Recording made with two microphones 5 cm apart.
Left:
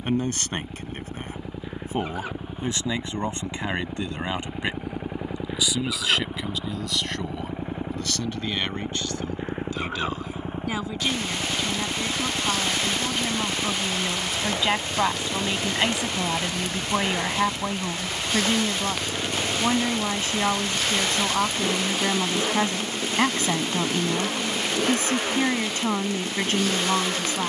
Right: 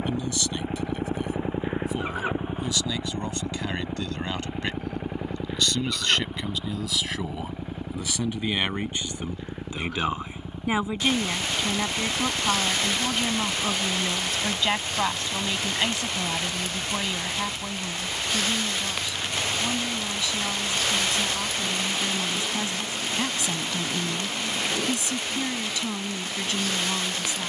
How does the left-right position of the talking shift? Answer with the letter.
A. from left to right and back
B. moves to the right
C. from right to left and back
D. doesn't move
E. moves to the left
A.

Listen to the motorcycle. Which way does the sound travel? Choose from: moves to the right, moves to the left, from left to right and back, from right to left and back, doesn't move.
moves to the left.